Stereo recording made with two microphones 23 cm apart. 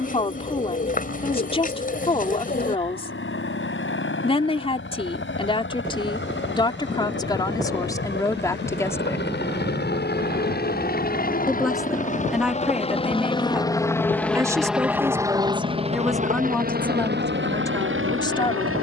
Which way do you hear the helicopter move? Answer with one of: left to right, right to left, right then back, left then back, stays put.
left to right.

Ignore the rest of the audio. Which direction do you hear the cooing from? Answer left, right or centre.
left.